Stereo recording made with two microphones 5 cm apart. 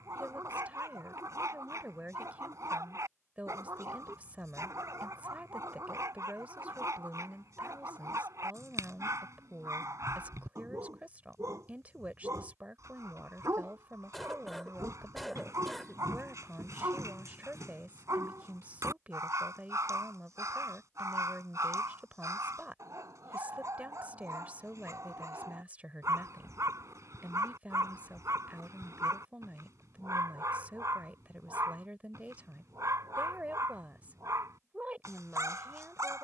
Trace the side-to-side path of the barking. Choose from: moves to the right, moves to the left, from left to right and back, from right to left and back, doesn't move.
doesn't move.